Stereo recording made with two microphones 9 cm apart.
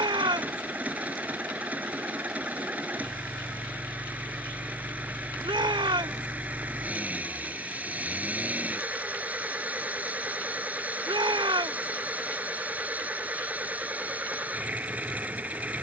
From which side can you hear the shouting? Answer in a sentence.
You can hear the shouting on the right.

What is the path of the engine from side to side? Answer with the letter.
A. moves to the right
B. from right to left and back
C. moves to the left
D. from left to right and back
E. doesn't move
E.